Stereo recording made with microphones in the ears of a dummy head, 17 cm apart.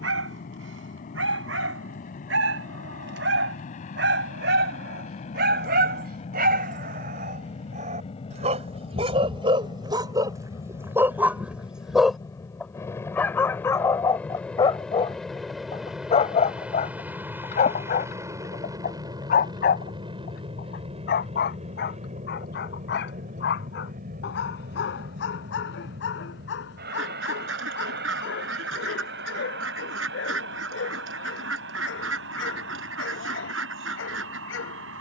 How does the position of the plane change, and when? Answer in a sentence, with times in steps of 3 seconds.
You can hear the plane on the left from 0 s, in the centre from 12 s and on the right from 18 s.